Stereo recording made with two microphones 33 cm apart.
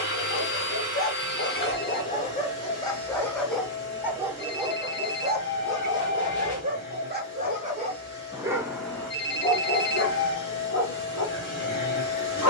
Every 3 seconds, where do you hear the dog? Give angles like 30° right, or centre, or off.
30° left, 10° right, 20° right, 30° left.